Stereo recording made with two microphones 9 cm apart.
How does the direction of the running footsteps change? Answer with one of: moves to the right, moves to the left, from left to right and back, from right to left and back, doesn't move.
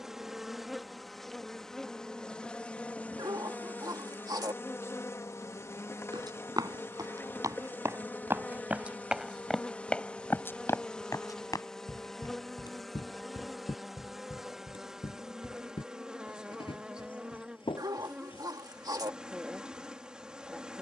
moves to the left.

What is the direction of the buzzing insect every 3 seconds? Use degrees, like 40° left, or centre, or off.
centre, 30° left, 20° left, 10° left, centre, 10° right, 10° right.